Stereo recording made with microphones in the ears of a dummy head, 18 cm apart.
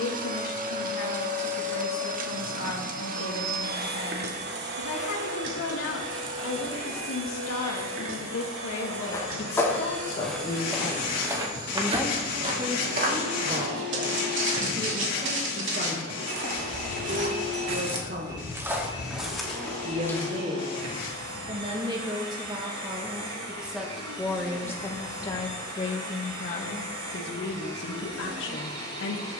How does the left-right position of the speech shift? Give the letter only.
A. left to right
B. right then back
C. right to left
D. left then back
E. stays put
B.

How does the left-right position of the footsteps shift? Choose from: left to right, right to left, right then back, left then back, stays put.
right then back.